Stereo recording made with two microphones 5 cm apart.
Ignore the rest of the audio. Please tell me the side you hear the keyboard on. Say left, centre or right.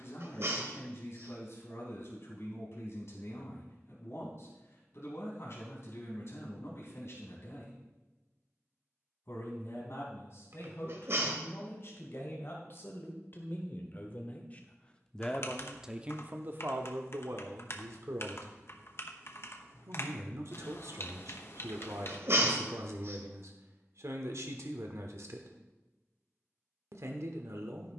left.